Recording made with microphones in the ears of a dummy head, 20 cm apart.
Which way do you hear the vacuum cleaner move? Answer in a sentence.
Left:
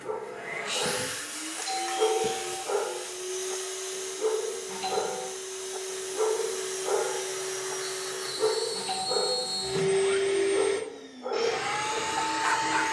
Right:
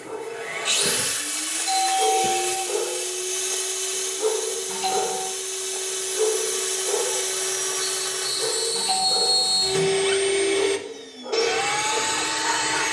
In this clip you hear the vacuum cleaner stay put.